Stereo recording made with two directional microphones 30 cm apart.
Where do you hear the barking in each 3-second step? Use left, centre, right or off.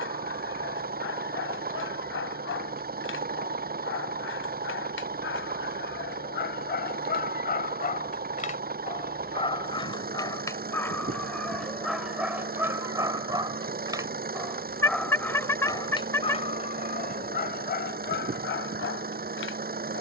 left, left, left, centre, centre, left, left.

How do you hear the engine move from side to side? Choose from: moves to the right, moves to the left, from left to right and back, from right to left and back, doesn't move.
doesn't move.